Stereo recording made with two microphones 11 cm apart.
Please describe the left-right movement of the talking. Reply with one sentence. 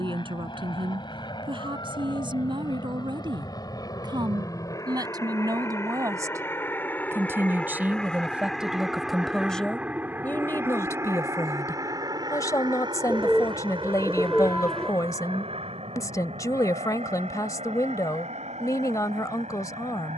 You can hear the talking go from the right side to the left.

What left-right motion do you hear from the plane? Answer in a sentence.
You can hear the plane move to the right.